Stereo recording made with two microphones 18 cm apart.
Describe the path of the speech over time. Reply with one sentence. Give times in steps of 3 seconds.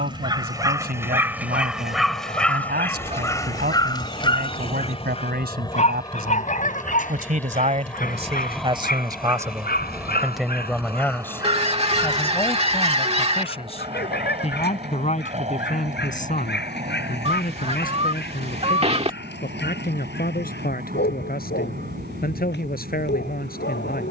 In this clip you hear the speech on the right from 0 s, in the centre from 9 s and on the left from 12 s.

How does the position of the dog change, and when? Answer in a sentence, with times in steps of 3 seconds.
You can hear the dog in the centre from 0 s and on the left from 3 s.